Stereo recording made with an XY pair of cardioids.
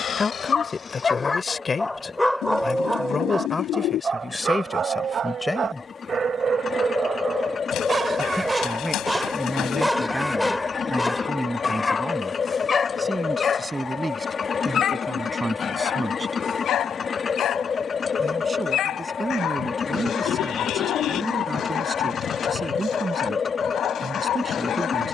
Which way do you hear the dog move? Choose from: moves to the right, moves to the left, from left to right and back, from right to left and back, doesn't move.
from left to right and back.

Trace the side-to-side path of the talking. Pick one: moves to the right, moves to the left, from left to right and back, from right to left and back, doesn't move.
moves to the right.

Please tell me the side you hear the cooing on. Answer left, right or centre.
left.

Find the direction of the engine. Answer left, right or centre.
left.